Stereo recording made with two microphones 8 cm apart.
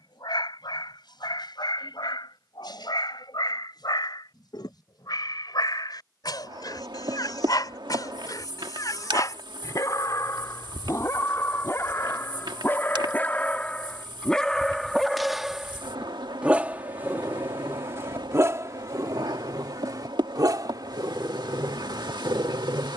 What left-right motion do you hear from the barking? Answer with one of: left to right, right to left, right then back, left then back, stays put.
left to right.